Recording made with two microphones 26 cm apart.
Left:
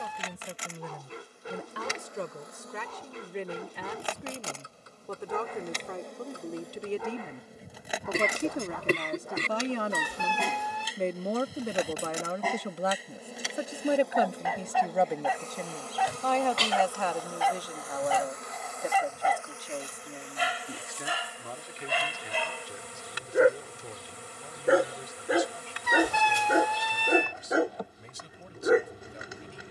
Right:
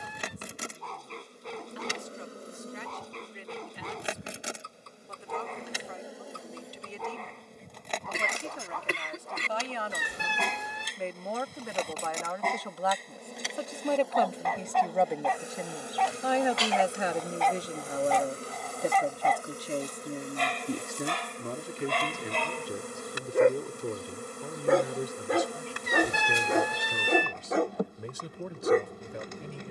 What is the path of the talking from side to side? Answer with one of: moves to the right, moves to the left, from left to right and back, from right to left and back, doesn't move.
moves to the right.